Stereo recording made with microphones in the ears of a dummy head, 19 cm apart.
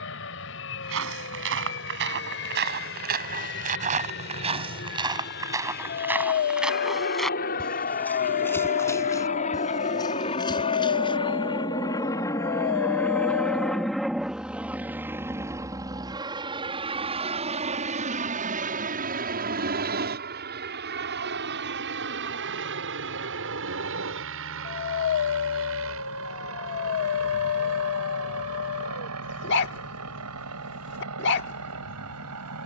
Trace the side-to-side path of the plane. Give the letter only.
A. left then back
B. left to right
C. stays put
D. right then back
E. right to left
B.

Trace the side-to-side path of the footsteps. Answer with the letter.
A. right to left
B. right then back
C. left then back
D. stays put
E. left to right
A.